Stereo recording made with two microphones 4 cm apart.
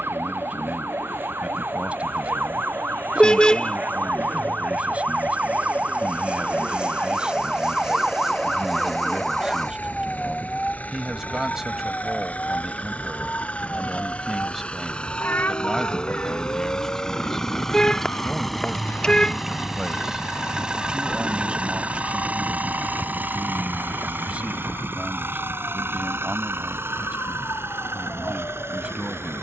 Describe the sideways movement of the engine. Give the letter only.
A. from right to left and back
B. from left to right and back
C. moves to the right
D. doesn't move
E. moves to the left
C.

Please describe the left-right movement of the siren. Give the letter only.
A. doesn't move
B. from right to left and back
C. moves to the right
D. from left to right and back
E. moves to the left
E.